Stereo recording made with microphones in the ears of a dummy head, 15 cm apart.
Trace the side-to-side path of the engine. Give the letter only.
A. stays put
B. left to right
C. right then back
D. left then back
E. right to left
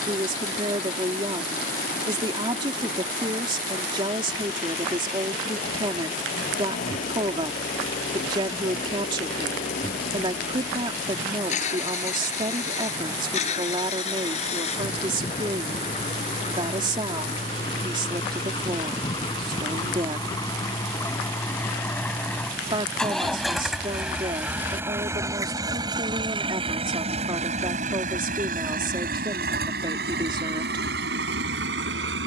B.